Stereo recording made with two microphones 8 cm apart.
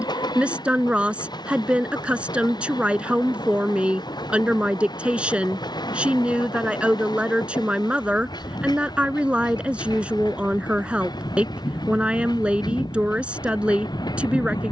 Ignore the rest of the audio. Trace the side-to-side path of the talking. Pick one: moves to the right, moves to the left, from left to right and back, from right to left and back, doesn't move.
doesn't move.